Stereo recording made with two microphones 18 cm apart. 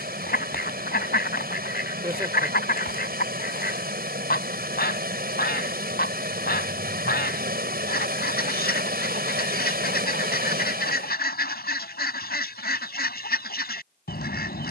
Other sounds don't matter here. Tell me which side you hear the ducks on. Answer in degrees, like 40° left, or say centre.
60° left.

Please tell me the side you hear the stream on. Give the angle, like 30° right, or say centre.
60° right.